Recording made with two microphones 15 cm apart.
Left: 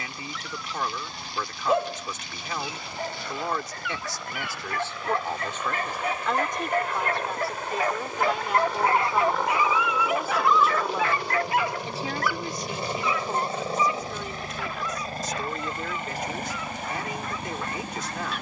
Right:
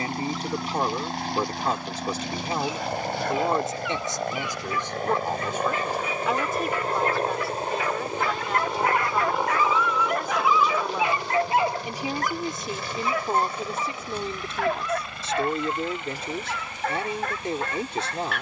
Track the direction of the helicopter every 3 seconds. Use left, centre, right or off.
right, right, right, centre, left, left.